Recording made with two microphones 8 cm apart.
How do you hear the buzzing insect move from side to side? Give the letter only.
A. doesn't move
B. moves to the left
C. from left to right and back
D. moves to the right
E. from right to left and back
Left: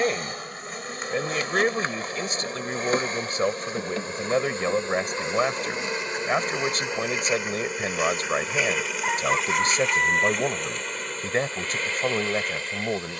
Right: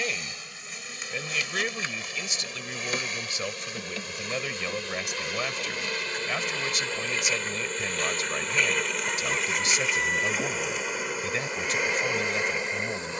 D.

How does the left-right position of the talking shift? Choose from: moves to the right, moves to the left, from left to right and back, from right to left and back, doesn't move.
doesn't move.